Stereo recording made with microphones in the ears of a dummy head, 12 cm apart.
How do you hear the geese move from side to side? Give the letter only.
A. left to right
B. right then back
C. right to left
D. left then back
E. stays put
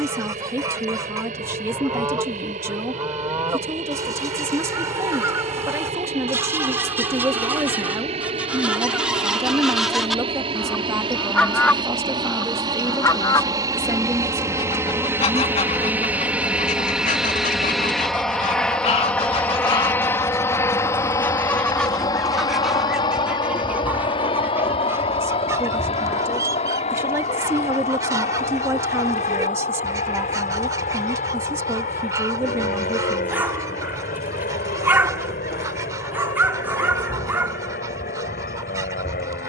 D.